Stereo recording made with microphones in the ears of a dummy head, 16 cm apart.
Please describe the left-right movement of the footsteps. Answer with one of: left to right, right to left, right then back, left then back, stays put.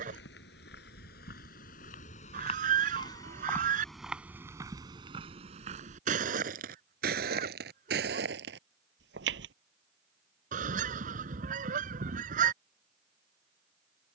left to right.